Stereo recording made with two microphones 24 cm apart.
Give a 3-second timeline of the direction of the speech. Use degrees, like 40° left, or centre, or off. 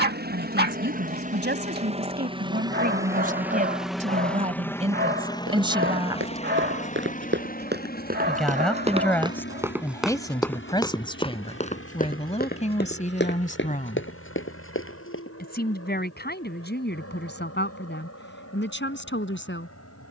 40° right, 30° right, centre, 20° left, 30° left, 40° left, 50° left.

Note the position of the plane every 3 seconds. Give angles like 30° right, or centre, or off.
30° right, 10° left, 30° left, 50° left, 60° left, 60° left, 60° left.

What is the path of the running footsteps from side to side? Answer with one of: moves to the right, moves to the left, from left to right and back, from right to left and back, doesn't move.
moves to the left.